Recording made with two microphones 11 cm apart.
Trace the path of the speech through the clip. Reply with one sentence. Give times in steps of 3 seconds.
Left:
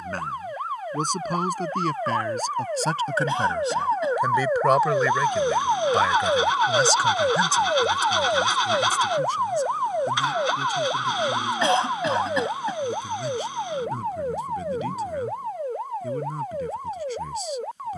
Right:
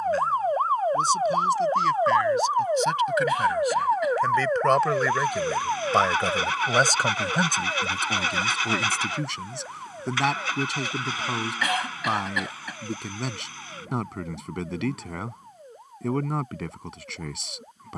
In this clip you hear the speech on the left from 0 s, in the centre from 3 s and on the right from 6 s.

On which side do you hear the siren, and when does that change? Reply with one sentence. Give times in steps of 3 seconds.
In this clip you hear the siren on the right from 0 s, in the centre from 3 s and on the left from 6 s.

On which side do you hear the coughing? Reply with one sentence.
You can hear the coughing on the left.